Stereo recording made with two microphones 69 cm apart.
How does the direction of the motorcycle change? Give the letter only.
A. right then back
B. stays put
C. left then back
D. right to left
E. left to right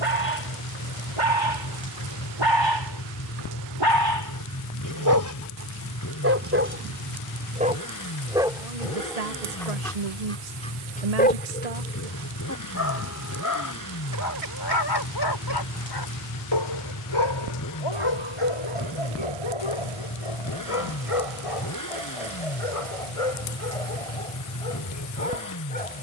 B.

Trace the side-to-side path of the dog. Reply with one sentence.
In this clip you hear the dog move to the left.